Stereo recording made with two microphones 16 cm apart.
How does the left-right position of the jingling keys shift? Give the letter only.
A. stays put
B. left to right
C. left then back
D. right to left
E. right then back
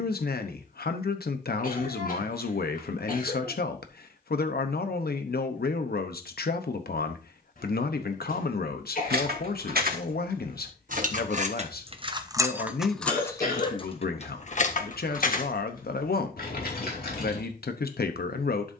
D.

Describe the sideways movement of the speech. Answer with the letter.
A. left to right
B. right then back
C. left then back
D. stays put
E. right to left
D.